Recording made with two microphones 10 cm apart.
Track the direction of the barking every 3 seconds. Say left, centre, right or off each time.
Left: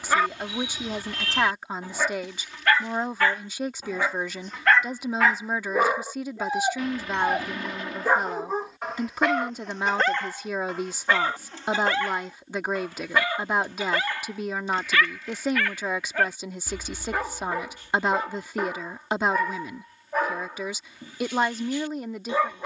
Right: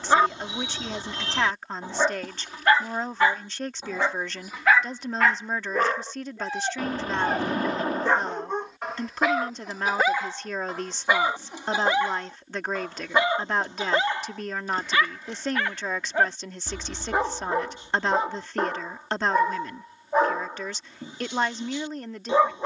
right, centre, centre, centre, right, right, right, right.